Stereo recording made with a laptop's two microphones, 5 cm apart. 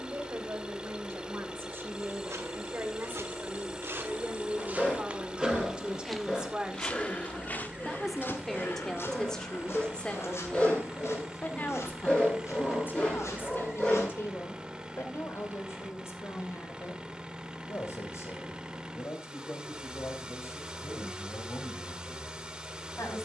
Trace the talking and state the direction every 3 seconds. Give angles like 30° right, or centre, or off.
50° right, 30° right, 10° right, 20° left, 50° left, 60° left, 70° left, 70° left.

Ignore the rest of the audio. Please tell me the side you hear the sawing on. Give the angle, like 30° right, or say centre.
20° left.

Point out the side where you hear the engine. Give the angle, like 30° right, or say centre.
20° right.